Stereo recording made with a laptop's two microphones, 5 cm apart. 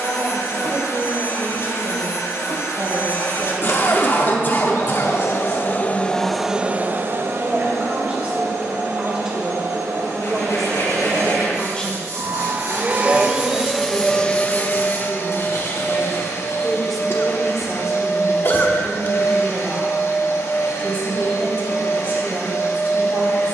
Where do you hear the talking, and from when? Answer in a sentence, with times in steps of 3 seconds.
You can hear the talking on the right from 0 s, in the centre from 9 s, on the left from 12 s, in the centre from 15 s and on the right from 18 s.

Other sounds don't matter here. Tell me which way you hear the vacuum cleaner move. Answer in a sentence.
You can hear the vacuum cleaner go right and come back.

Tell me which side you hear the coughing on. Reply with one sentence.
In this clip you hear the coughing on the left.